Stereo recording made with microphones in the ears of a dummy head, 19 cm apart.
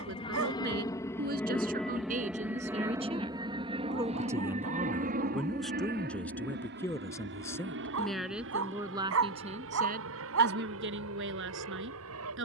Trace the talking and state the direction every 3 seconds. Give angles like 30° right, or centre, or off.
40° right, 10° right, centre, 50° right.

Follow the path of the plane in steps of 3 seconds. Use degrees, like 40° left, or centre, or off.
10° left, 30° right, 50° right, 60° right.